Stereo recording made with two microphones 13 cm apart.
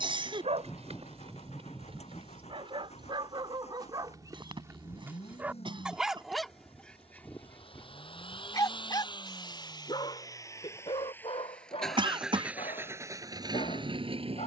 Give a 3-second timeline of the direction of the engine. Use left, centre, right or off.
left, left, left, left, right.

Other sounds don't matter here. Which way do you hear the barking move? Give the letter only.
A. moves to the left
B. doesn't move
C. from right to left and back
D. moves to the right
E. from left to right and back
A.